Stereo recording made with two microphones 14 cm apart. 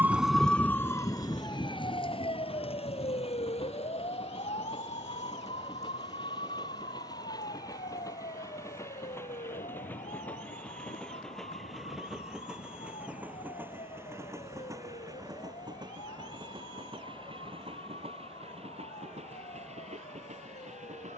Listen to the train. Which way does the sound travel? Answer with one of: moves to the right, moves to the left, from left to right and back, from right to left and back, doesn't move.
moves to the right.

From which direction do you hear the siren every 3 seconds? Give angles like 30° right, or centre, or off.
30° left, 50° left, 60° left, 60° left, 60° left, 60° left, 60° left.